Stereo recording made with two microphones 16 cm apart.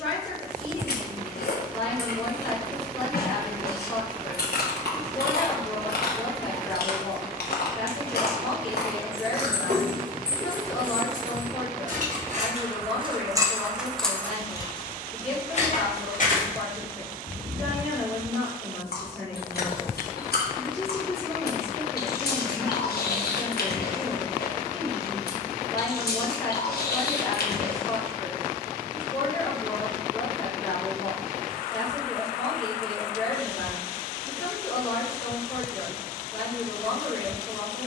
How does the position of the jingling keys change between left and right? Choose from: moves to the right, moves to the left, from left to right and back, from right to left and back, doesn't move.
moves to the left.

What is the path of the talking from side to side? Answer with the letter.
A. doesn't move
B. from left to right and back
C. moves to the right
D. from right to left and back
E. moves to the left
A.